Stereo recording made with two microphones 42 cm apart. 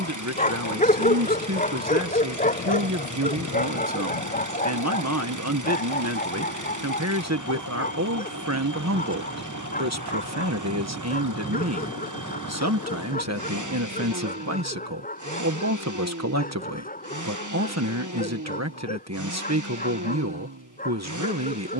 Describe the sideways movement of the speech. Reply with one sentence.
You can hear the speech stay in one place.